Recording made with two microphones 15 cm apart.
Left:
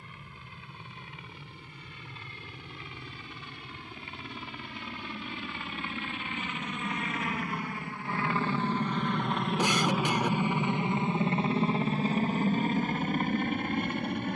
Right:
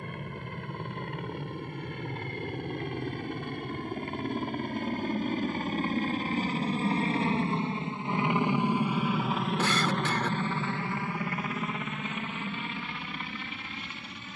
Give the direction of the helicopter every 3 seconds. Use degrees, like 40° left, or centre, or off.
60° right, 50° right, 30° right, 10° left, 40° left.